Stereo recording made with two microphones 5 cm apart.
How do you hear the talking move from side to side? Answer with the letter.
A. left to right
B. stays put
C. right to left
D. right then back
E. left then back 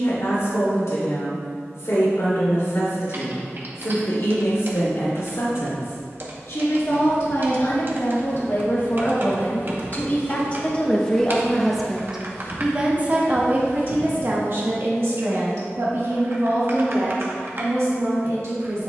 A.